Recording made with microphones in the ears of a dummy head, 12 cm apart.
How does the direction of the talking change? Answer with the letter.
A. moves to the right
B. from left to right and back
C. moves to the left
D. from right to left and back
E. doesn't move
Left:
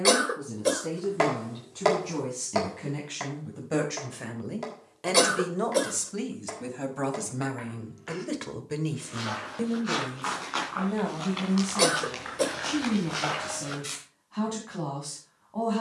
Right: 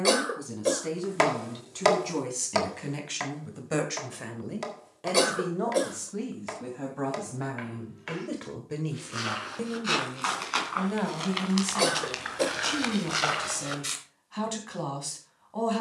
D.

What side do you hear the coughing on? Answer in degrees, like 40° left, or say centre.
10° left.